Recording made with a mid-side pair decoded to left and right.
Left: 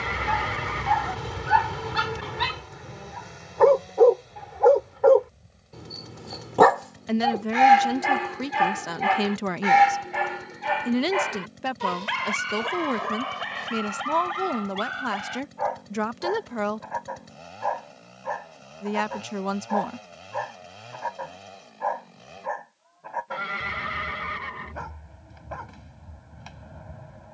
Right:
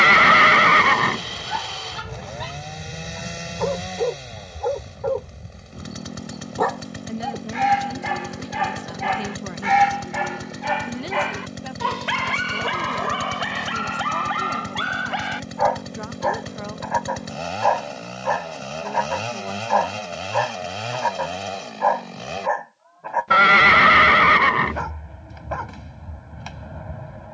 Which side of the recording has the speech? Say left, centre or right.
left.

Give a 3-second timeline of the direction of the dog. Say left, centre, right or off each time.
left, left, left, centre, right, right, right, right, right.